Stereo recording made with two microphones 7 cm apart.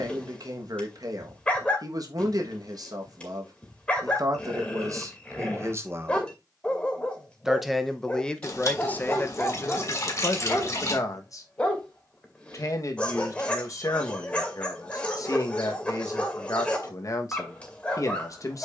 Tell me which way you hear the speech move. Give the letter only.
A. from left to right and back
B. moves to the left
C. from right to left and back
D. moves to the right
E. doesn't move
B.